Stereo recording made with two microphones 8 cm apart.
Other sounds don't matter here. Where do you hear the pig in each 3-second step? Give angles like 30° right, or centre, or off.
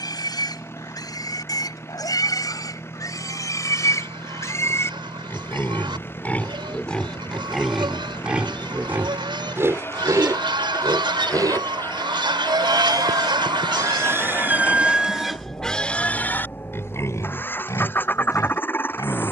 50° left, 40° left, centre, 50° right, 40° right, 20° left, 50° left.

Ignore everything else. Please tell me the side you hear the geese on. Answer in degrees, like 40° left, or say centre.
80° right.